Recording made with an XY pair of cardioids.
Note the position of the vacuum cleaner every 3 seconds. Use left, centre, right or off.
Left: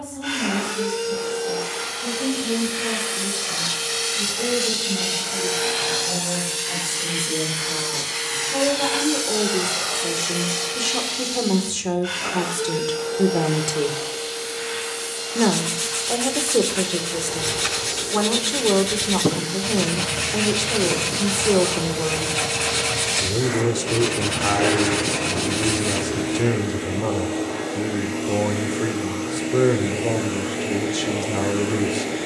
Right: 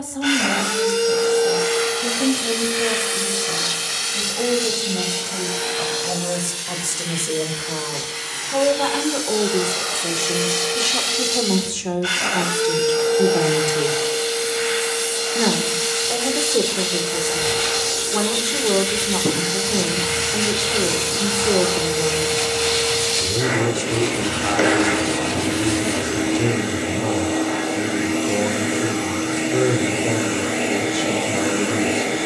right, centre, left, right, right, right, right, right, right, right, right.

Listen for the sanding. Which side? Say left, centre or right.
left.